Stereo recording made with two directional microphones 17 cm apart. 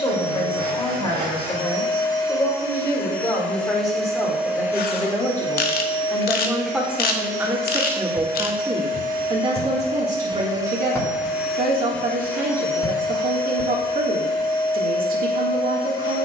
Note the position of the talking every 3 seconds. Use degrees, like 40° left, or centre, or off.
20° left, 10° left, 10° right, 40° right, 50° right, 50° right.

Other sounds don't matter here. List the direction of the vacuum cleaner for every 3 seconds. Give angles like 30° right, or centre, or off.
30° left, 10° right, 50° right, 20° right, 20° left, 20° left.